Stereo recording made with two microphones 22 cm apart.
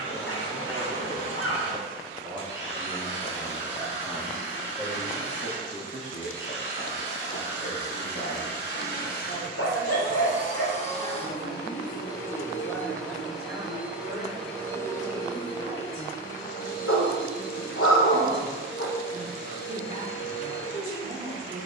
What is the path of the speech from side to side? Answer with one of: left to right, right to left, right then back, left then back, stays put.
left then back.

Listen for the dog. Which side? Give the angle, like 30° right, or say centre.
70° left.